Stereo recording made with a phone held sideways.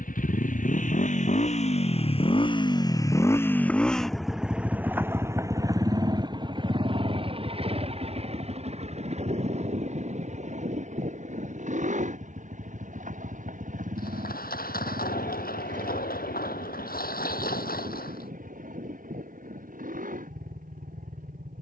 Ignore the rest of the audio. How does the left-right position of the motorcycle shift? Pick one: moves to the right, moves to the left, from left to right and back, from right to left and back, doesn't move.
moves to the right.